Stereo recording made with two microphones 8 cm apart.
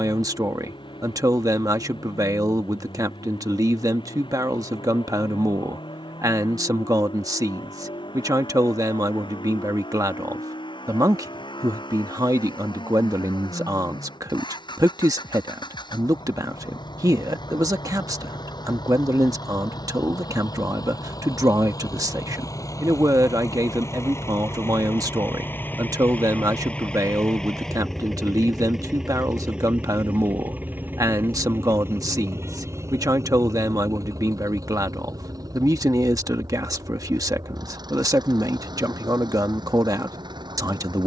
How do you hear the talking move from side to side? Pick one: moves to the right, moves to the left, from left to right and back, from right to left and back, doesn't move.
doesn't move.